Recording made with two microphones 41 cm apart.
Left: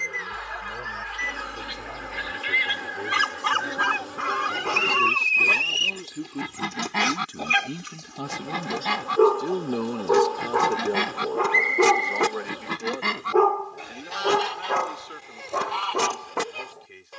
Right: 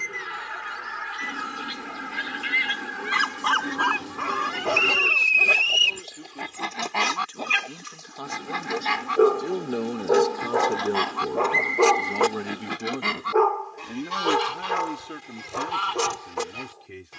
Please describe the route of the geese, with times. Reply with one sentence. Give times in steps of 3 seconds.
You can hear the geese on the right from 0 s, in the centre from 3 s, on the left from 6 s, in the centre from 12 s and on the right from 15 s.